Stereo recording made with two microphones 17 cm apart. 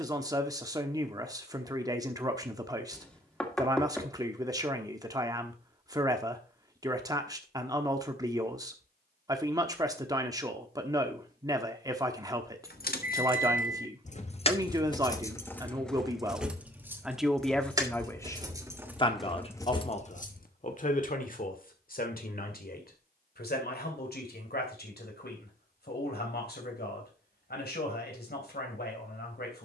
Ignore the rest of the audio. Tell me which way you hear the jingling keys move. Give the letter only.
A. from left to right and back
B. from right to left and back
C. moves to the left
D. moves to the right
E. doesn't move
A.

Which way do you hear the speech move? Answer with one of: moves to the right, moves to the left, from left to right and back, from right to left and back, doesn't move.
moves to the left.